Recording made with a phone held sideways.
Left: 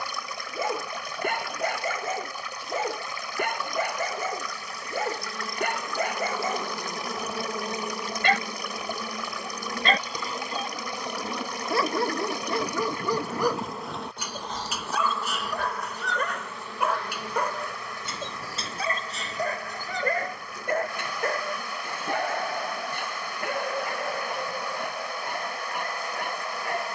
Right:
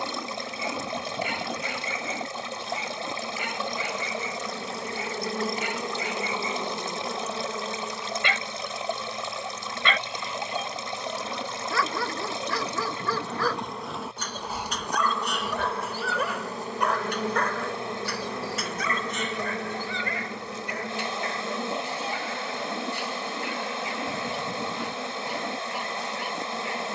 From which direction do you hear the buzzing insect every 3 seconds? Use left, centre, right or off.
right, right, centre, left, centre, right, right, right, right.